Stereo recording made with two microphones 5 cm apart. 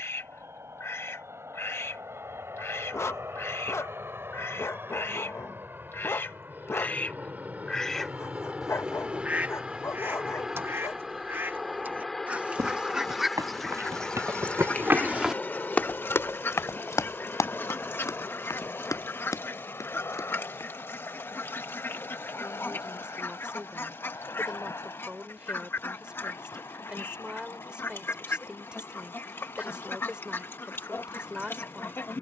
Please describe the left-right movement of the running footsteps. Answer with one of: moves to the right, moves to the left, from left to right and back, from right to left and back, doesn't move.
moves to the left.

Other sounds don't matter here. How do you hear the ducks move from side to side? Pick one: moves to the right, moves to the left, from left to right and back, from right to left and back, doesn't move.
from left to right and back.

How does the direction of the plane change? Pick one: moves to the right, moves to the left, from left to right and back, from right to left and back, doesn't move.
moves to the left.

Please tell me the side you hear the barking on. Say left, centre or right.
left.